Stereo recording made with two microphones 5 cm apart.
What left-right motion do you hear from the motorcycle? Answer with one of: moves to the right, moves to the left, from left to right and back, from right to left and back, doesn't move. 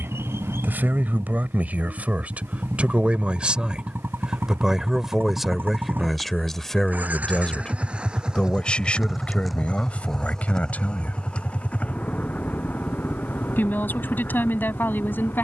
moves to the left.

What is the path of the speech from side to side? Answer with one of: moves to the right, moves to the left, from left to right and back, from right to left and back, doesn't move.
moves to the left.